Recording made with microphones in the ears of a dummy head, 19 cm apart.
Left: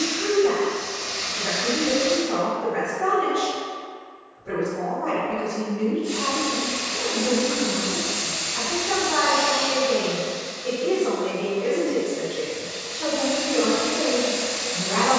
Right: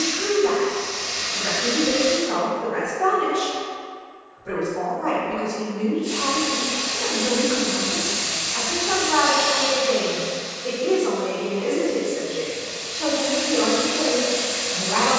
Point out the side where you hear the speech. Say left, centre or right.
right.